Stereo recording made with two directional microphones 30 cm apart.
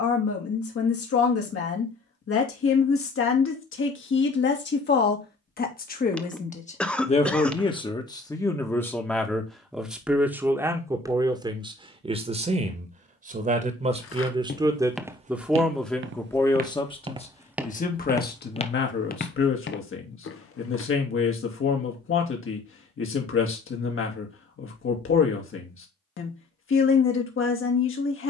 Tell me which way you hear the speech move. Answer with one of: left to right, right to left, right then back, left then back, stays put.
right then back.